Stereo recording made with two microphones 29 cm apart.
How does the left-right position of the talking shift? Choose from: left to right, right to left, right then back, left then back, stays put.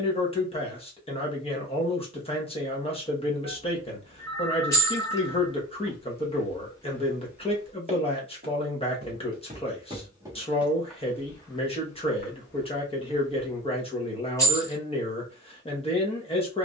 stays put.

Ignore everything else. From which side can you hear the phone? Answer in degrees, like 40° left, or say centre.
50° left.